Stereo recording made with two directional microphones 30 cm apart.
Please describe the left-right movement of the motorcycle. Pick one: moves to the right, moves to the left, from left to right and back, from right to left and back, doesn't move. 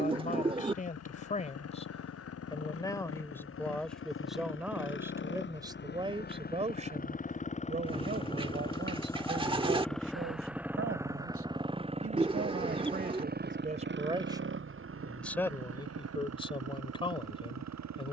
moves to the right.